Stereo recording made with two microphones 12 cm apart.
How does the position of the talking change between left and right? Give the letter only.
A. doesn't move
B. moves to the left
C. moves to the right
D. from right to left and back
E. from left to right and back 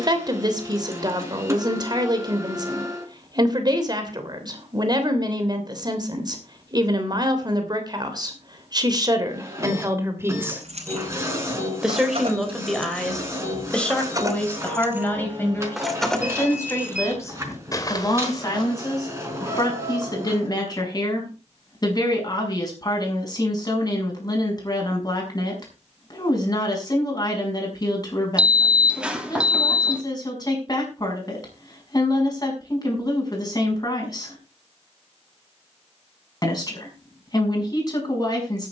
B.